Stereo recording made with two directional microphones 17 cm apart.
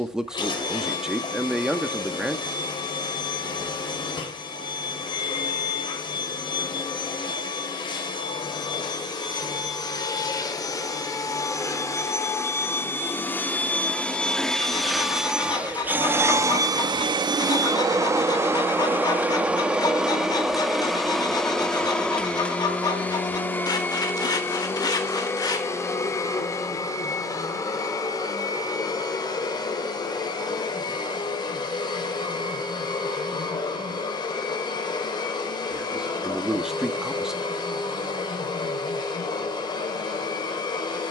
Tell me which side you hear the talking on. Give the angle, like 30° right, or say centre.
centre.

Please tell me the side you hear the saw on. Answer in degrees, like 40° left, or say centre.
20° left.